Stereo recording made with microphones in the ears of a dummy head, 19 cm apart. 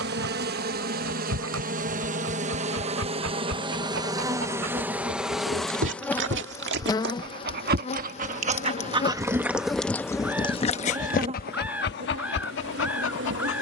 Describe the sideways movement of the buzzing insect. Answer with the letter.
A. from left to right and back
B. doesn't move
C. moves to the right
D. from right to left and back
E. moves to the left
D.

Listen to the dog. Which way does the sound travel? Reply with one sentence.
In this clip you hear the dog move from right to left.